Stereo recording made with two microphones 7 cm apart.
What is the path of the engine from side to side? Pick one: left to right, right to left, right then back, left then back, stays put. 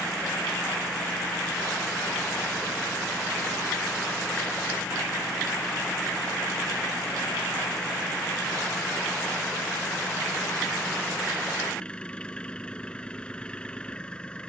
stays put.